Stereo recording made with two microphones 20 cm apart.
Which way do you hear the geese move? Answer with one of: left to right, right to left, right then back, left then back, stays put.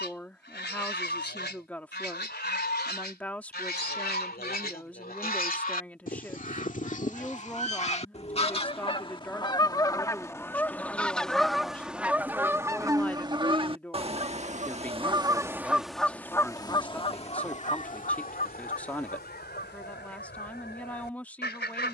right then back.